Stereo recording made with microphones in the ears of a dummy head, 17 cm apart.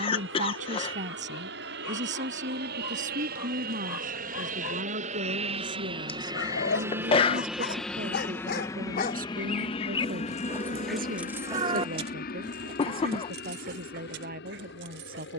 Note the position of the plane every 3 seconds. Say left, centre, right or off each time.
right, right, centre, left, left.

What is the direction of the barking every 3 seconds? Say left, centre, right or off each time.
left, left, left, centre, right.